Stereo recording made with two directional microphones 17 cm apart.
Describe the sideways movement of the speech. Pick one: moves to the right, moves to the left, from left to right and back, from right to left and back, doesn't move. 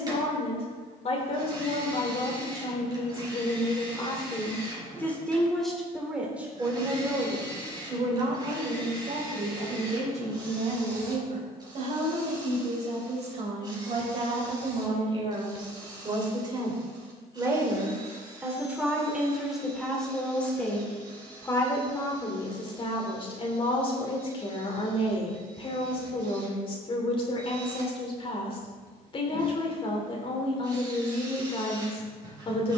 from left to right and back.